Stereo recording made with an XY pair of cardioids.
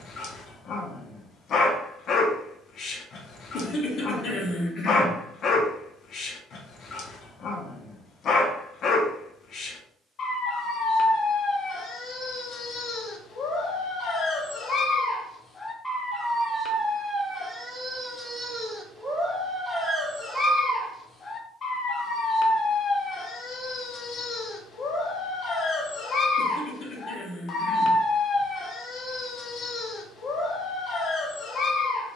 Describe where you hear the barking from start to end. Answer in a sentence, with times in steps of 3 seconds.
You can hear the barking on the left from 0 s, in the centre from 15 s and on the left from 21 s.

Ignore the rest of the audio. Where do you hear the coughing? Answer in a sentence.
You can hear the coughing on the left.